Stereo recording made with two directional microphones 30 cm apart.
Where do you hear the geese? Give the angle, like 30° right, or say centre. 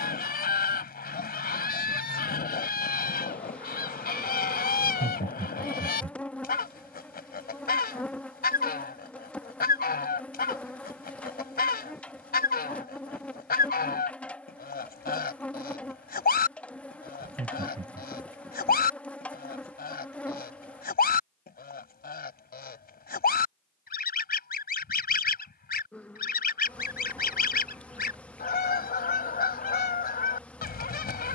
30° left.